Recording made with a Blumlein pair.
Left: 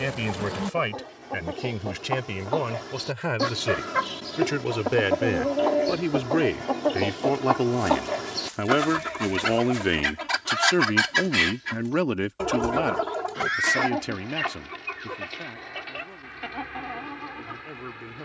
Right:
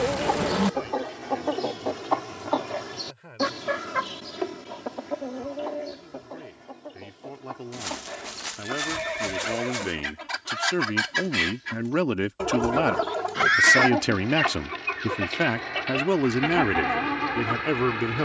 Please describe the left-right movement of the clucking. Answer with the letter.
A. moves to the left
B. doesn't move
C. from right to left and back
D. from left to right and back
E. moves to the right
C.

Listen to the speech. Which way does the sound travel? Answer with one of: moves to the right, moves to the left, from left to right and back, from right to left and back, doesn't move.
moves to the right.